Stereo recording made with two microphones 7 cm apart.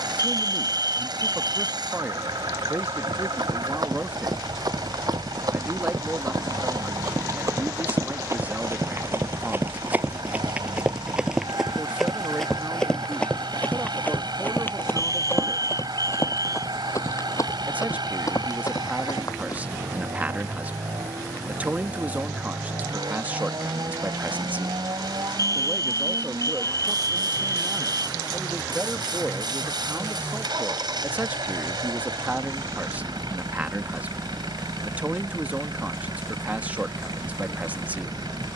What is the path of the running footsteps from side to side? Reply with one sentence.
You can hear the running footsteps move to the left.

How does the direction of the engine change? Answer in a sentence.
In this clip you hear the engine stay put.